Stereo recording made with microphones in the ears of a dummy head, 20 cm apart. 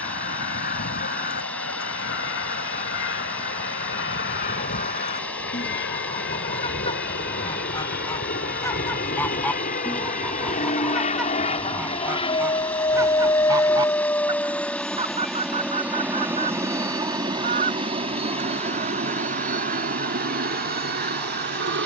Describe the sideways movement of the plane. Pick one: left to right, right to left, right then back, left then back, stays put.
left to right.